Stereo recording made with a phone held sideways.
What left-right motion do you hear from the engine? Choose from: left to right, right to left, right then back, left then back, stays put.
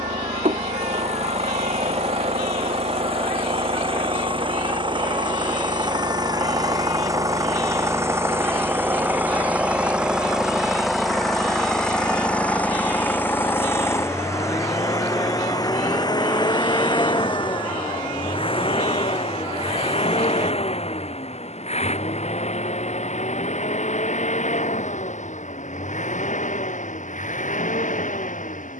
right to left.